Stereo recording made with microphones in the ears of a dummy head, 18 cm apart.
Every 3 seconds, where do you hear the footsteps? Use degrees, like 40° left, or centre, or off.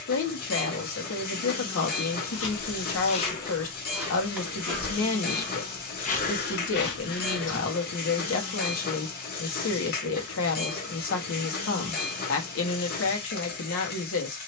60° left, 10° left, 50° left, off, off.